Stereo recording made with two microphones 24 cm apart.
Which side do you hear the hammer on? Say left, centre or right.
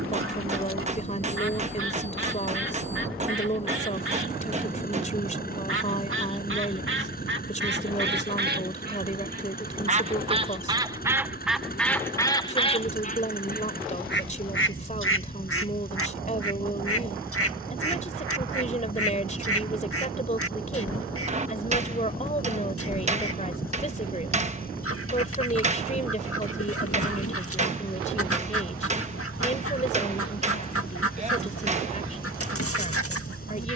right.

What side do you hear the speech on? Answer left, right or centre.
left.